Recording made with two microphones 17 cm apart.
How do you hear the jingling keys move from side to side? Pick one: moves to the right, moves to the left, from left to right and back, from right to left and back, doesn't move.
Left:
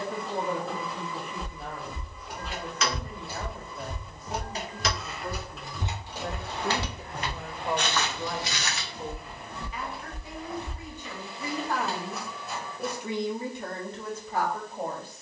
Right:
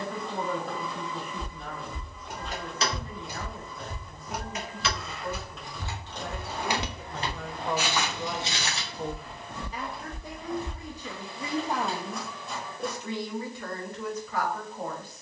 from right to left and back.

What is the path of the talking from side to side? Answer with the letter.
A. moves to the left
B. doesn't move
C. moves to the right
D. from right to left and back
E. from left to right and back
E.